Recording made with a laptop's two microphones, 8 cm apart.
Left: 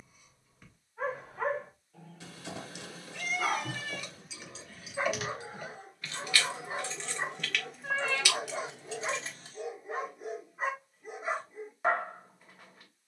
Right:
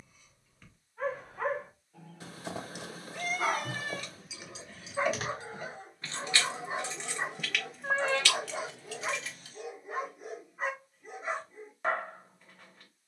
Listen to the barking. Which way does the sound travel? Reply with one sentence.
In this clip you hear the barking move from left to right and back again.